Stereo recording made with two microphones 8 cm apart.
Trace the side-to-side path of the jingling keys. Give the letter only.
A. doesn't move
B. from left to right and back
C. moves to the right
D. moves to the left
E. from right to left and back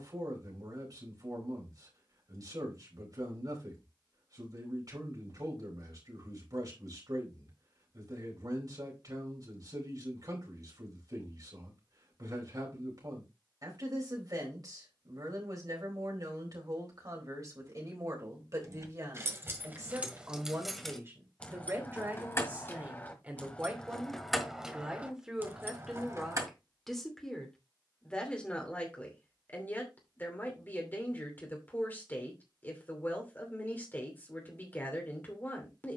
E.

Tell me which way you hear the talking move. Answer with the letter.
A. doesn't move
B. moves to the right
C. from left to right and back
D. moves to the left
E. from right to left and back
D.